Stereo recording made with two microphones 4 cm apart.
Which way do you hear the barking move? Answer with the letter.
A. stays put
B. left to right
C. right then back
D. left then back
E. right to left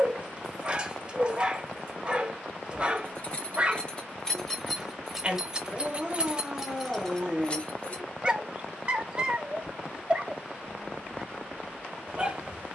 A.